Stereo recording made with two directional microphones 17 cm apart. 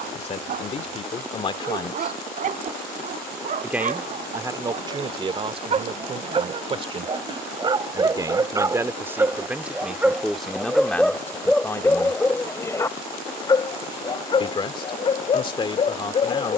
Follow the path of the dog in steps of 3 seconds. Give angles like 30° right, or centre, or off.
50° right, 40° right, 30° right, centre, 20° left, 30° left.